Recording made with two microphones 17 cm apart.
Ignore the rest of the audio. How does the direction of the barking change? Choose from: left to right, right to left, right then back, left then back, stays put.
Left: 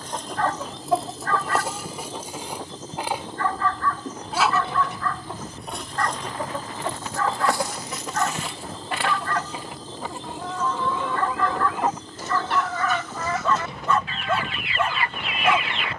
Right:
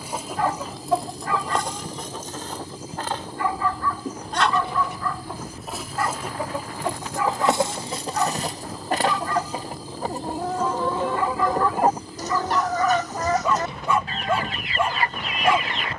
stays put.